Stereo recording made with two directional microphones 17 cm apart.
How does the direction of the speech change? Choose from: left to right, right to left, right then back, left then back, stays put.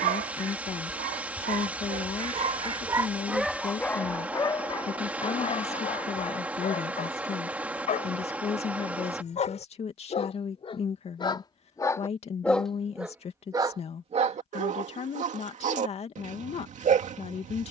stays put.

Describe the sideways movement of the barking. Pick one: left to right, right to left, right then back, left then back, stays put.
left then back.